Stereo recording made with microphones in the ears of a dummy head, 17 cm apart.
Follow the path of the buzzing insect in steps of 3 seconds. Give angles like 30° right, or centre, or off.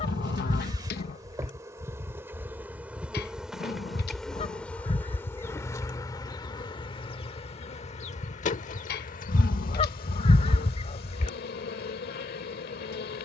20° right, 10° left, 30° left, 50° left, 50° left.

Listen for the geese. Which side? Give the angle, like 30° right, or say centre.
30° left.